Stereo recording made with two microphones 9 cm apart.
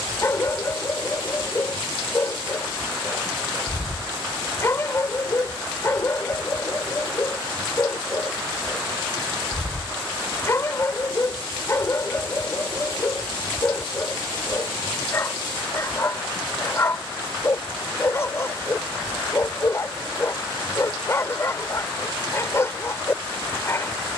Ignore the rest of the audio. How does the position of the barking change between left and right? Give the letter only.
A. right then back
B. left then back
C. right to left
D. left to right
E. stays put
E.